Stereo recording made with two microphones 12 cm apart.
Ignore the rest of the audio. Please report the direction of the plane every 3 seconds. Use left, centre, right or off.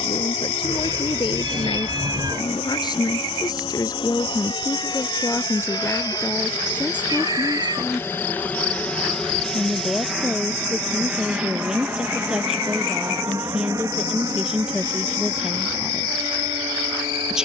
left, left, left, centre, right, right.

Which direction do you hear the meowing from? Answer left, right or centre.
right.